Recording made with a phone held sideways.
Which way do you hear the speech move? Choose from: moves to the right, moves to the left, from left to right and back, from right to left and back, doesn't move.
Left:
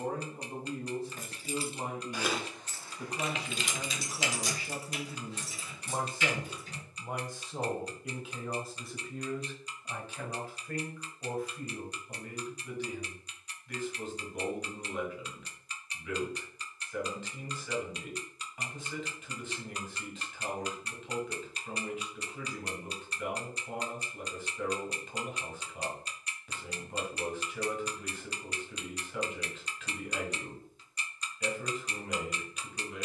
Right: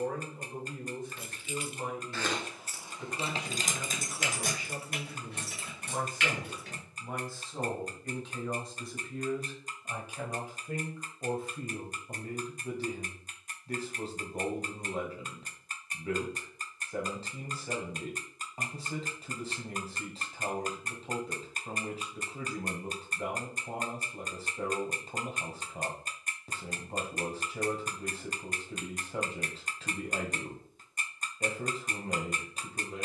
moves to the right.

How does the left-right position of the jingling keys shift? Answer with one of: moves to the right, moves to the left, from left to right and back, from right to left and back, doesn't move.
moves to the right.